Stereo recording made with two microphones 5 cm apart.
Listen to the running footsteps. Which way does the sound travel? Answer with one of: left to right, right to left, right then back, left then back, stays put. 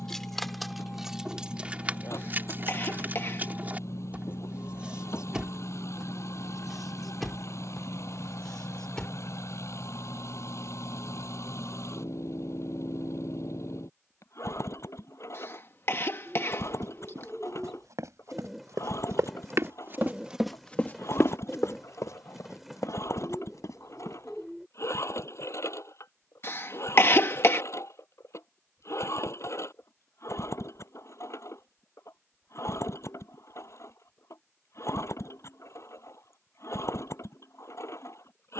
right to left.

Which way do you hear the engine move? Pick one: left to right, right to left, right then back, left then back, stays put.
stays put.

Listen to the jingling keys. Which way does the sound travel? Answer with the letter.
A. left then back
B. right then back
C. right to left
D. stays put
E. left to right
B.